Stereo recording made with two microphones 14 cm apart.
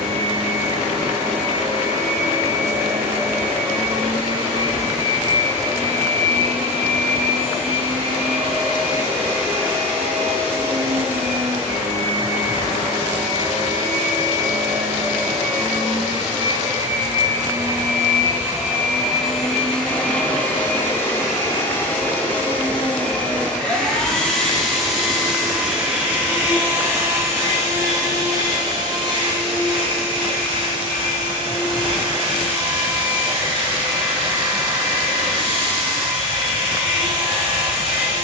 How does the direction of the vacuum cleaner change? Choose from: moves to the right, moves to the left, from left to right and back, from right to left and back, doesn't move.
from right to left and back.